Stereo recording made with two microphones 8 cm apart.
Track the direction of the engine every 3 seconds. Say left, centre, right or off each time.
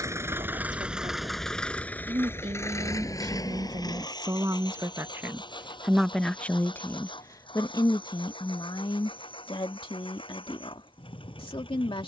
centre, left, left, left.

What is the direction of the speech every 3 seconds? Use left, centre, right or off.
right, right, left, left.